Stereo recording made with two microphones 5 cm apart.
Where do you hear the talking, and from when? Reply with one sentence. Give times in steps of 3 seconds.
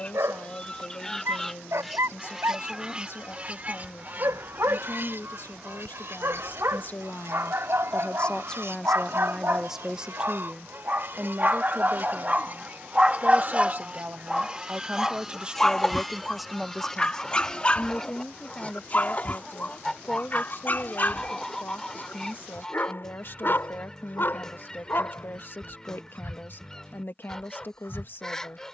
You can hear the talking on the left from 0 s, on the right from 9 s, in the centre from 15 s and on the left from 18 s.